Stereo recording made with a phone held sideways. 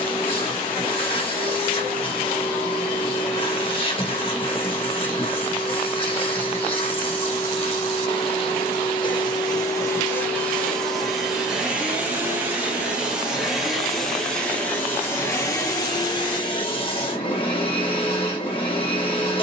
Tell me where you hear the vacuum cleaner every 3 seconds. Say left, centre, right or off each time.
left, left, left, centre, centre, left, left.